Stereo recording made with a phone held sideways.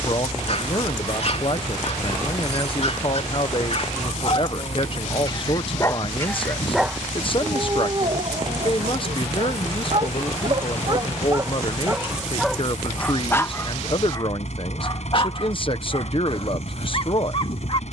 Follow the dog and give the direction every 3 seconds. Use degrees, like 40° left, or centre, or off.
50° left, 40° left, 30° right, 30° right, 20° left, 50° left.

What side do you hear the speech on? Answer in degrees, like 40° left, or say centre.
40° left.